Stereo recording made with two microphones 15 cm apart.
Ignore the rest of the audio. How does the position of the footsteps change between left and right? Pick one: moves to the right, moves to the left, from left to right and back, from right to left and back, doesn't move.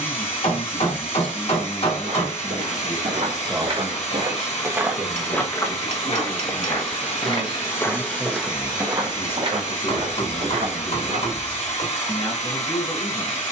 from right to left and back.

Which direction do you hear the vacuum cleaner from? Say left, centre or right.
left.